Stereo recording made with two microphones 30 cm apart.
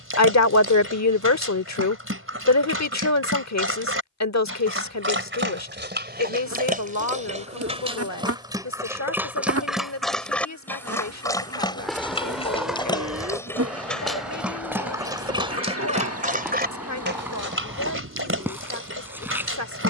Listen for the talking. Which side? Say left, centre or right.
left.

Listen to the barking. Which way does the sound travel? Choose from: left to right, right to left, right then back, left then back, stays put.
left then back.